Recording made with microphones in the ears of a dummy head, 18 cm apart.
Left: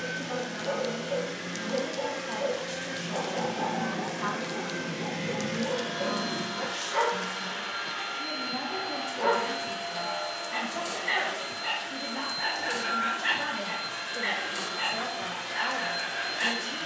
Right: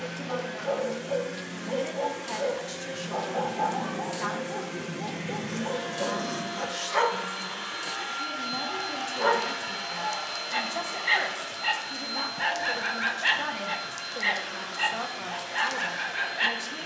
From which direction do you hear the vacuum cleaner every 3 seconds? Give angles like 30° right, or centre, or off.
40° left, 20° left, centre, 20° right, 20° left, 40° left.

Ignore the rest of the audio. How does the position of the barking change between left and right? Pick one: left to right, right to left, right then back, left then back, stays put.
stays put.